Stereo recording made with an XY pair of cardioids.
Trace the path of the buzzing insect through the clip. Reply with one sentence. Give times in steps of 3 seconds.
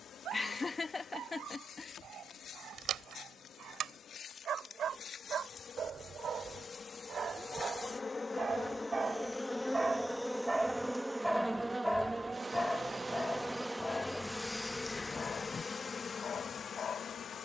You can hear the buzzing insect on the left from 0 s, in the centre from 9 s and on the left from 15 s.